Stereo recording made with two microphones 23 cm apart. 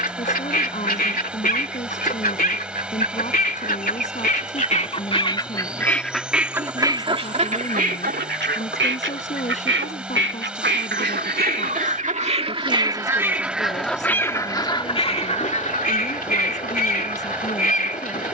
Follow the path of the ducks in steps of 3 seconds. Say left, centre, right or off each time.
left, left, right, right, centre, left.